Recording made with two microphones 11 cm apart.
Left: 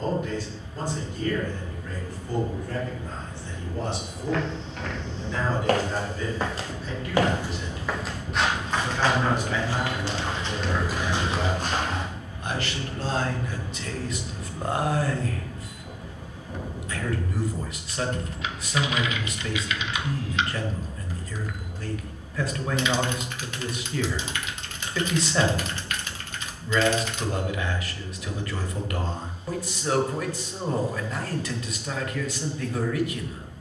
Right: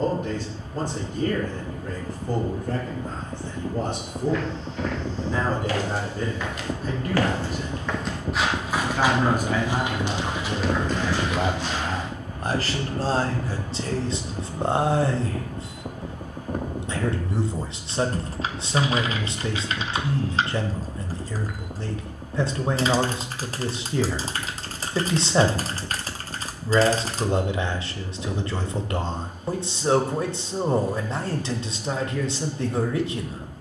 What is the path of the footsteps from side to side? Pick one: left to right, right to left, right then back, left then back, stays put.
right then back.